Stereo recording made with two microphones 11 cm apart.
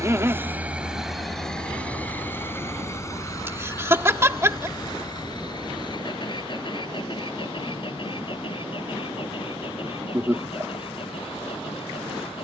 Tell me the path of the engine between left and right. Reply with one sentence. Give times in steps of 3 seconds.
You can hear the engine in the centre from 0 s and on the left from 3 s.